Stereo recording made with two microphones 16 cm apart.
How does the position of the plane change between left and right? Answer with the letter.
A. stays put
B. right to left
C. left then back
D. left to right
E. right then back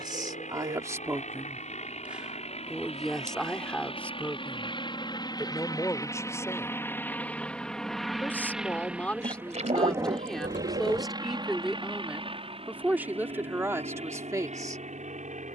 D.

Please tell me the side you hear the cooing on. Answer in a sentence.
You can hear the cooing on the right.